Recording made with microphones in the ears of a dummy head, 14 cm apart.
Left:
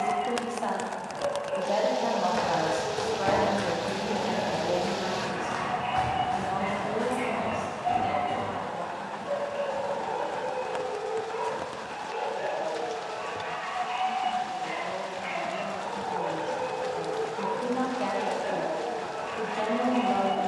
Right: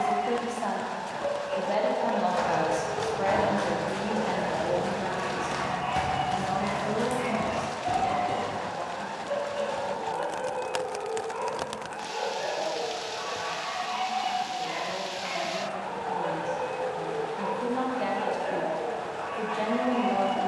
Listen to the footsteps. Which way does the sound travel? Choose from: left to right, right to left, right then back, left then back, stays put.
left to right.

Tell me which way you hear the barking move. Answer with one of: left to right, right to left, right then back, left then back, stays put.
stays put.